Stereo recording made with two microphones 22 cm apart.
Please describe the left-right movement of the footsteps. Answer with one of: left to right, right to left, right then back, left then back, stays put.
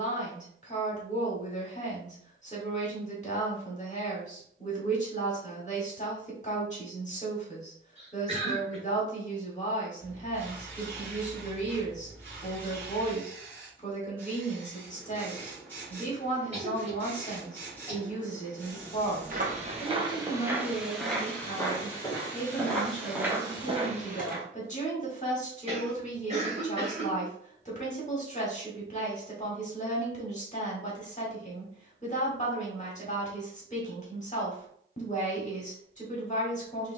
left then back.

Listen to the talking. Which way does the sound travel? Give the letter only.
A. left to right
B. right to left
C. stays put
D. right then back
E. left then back
C.